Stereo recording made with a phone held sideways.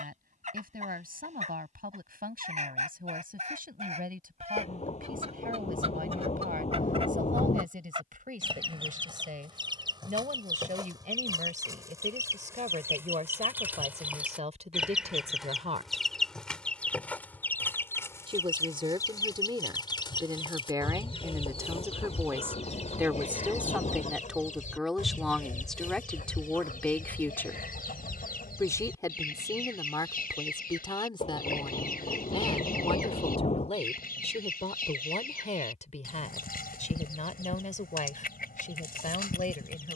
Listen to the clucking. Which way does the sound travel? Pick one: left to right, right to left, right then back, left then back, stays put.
right to left.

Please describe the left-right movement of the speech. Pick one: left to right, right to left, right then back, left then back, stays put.
right to left.